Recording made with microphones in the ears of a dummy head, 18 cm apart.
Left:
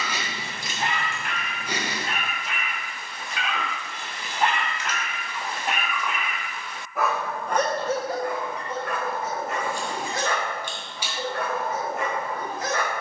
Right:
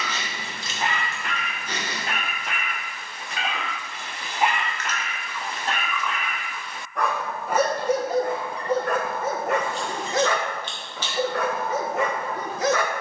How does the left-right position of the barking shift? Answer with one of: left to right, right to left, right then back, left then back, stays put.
left then back.